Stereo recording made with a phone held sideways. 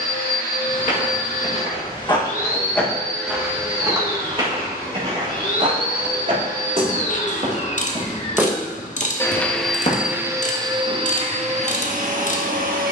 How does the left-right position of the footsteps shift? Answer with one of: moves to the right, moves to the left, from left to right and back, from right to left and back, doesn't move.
from left to right and back.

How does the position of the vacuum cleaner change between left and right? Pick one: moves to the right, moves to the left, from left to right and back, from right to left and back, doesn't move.
moves to the right.